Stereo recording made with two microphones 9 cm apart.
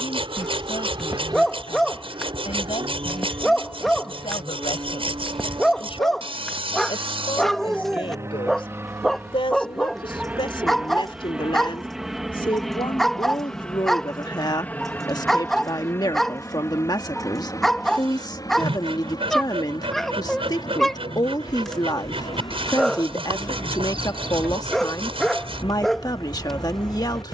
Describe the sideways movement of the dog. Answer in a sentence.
In this clip you hear the dog stay put.